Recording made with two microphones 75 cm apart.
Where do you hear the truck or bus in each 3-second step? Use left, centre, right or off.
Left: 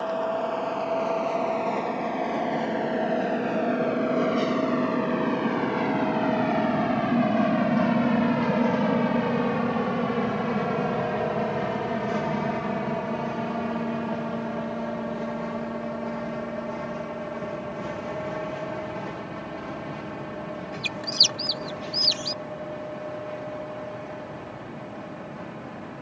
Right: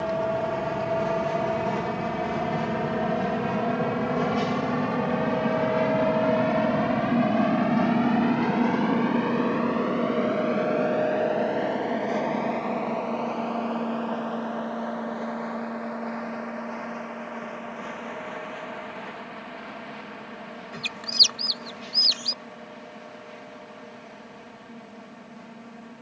right, right, centre, left, left, left, left, left, left.